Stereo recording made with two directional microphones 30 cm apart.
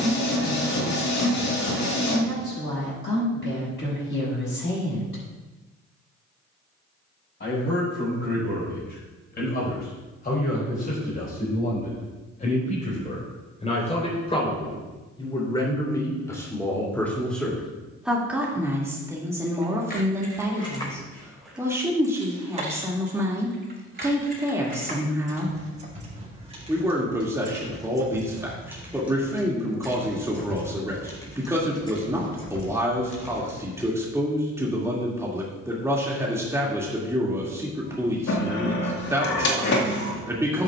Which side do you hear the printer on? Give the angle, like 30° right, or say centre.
60° left.